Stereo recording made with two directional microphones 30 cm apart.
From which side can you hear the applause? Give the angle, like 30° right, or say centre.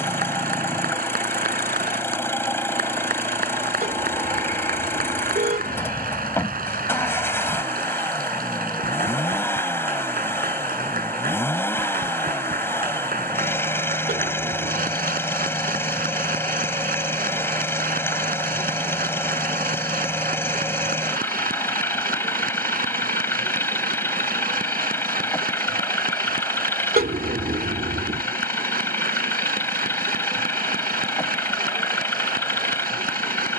30° right.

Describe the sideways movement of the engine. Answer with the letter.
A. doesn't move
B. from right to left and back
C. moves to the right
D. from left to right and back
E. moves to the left
A.